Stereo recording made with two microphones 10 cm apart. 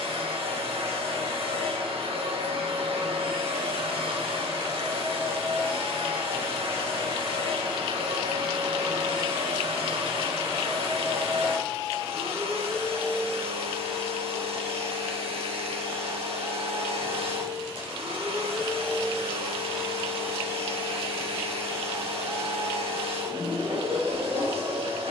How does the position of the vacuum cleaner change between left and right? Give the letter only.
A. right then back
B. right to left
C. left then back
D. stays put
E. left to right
D.